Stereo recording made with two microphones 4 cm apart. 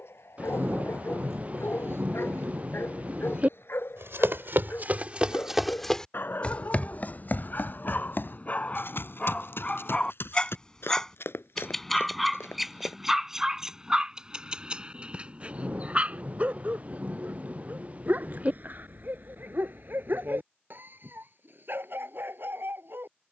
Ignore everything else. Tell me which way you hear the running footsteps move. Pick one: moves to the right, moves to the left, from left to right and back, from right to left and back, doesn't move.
moves to the left.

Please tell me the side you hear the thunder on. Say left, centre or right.
right.